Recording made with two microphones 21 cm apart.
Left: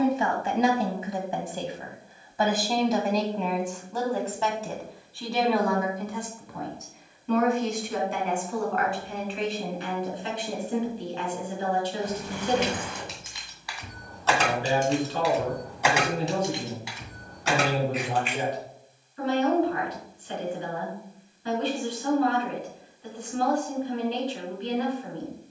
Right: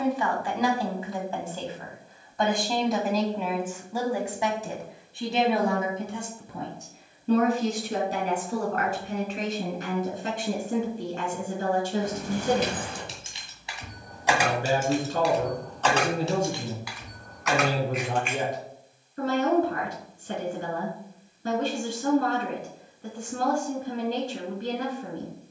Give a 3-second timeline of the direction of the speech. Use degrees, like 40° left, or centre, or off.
20° left, 10° right, 40° right, 50° right, 50° right, 50° right, 50° right, 50° right, 50° right.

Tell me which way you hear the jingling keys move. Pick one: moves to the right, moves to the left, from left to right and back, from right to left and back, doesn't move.
moves to the left.